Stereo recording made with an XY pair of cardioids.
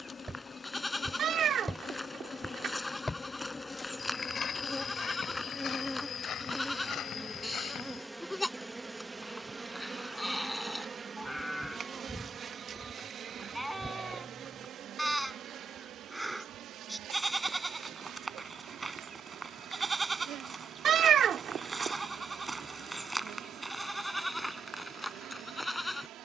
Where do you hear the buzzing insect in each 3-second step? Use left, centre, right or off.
left, left, centre, right, right, right, right, right, right.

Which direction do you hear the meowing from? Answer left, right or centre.
right.